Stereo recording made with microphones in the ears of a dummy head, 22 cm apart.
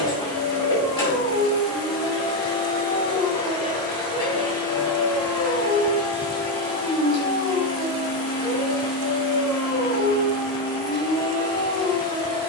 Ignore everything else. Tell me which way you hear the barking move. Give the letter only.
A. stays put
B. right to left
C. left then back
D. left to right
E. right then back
A.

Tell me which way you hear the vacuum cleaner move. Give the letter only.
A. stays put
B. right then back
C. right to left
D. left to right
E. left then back
A.